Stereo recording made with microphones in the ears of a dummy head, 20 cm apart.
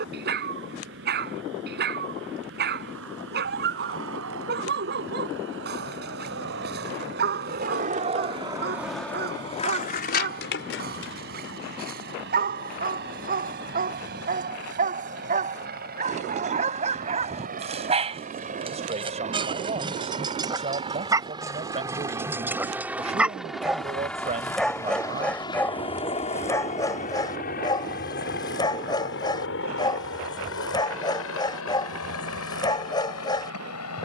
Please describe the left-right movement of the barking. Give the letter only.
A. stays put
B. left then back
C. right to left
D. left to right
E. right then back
C.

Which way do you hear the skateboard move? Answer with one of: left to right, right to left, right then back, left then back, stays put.
right to left.